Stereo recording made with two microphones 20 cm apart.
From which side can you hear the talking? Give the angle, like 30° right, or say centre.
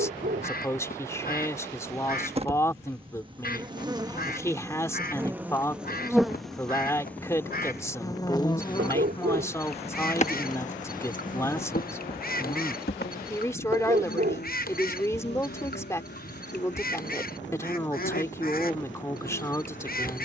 10° left.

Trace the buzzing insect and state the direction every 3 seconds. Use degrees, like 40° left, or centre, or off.
30° right, 20° right, 10° left, 40° left, 60° left, 70° left, 70° left.